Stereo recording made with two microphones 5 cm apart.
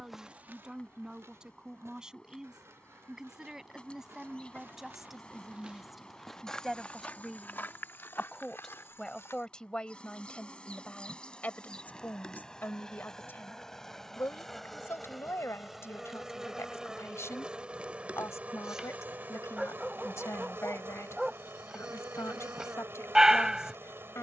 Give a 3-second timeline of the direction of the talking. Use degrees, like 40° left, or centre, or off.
10° right, centre, 10° left, 30° left, 50° left, 70° left, 80° left, 80° left.